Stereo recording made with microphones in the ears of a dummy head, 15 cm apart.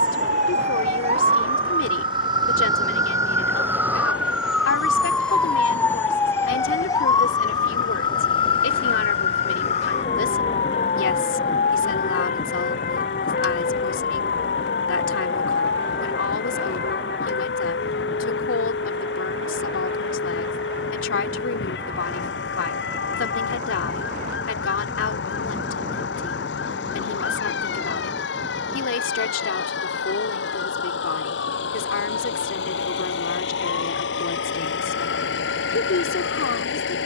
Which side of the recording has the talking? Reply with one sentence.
You can hear the talking on the left.